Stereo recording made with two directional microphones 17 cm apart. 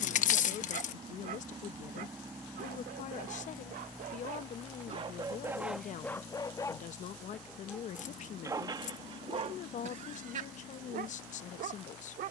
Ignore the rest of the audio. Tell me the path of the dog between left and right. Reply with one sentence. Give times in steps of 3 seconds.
In this clip you hear the dog on the right from 0 s, in the centre from 6 s and on the right from 9 s.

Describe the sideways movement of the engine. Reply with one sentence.
In this clip you hear the engine go from the right side to the left.